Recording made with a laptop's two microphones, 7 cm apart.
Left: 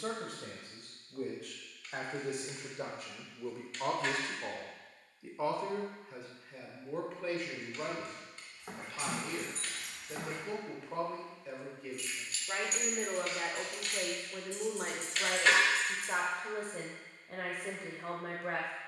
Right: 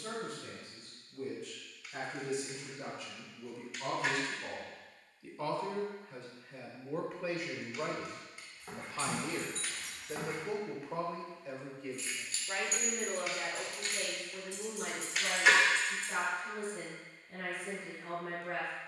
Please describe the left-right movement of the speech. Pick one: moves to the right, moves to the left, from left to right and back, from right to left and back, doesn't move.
from left to right and back.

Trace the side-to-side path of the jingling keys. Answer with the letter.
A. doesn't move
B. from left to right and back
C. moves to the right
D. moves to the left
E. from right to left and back
B.